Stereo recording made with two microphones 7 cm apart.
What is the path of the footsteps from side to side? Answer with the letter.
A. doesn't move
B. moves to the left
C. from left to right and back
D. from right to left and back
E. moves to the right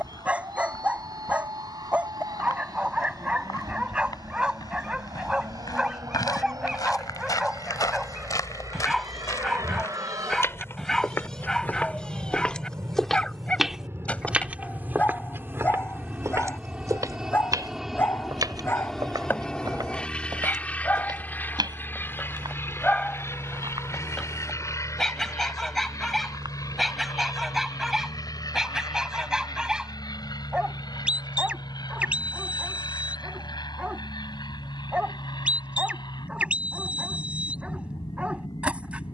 E.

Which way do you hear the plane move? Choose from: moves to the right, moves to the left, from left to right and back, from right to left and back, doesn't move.
moves to the left.